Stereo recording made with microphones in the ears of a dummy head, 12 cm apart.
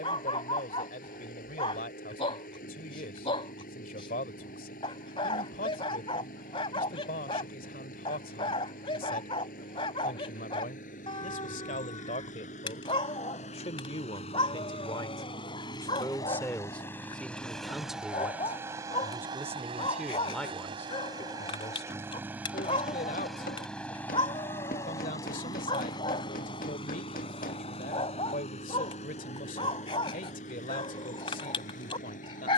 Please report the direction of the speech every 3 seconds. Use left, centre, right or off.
left, left, left, left, left, centre, centre, left, left, left, left.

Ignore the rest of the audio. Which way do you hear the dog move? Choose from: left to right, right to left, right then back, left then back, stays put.
stays put.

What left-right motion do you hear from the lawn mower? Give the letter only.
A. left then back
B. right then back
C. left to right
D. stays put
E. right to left
B.